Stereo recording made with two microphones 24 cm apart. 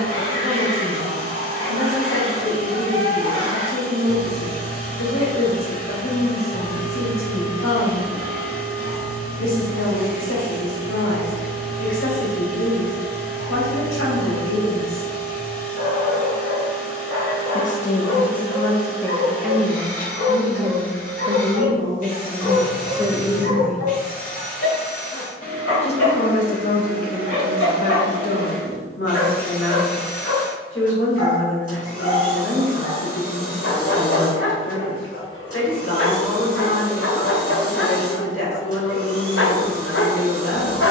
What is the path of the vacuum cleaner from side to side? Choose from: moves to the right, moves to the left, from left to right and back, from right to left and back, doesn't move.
doesn't move.